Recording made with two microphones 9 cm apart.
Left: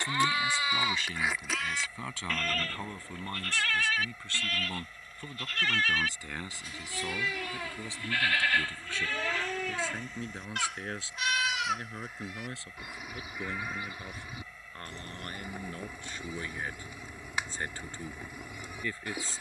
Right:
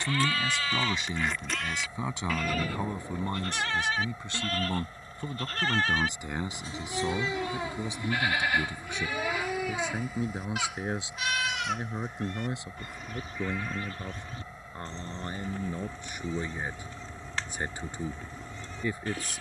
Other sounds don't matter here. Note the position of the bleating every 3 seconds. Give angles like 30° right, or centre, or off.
10° left, 30° right, 20° right, 10° right, 10° left, 10° left, 10° left.